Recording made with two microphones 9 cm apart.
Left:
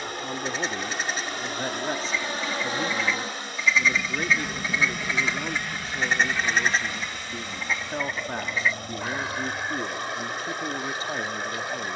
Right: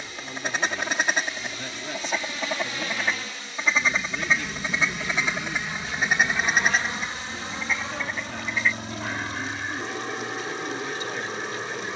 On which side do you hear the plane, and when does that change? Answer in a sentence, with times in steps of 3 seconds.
You can hear the plane on the left from 0 s, in the centre from 3 s and on the right from 6 s.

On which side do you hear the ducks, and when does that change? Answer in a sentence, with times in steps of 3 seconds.
In this clip you hear the ducks on the right from 0 s and in the centre from 6 s.